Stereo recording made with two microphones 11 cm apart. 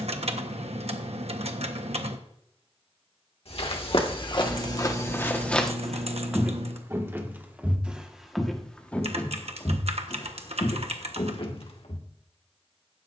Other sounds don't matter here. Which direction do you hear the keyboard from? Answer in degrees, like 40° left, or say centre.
70° right.